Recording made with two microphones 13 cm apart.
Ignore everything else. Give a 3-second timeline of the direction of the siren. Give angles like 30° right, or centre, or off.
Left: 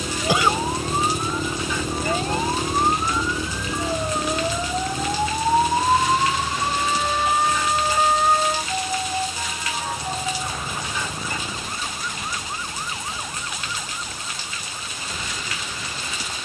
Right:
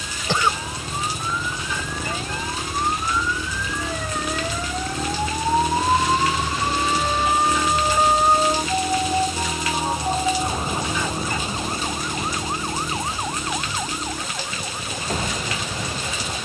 40° left, 20° left, 10° right, 30° right, 40° right, 50° right.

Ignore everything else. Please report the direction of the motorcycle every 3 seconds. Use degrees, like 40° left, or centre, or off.
40° left, centre, 40° right, 60° right, 70° right, 70° right.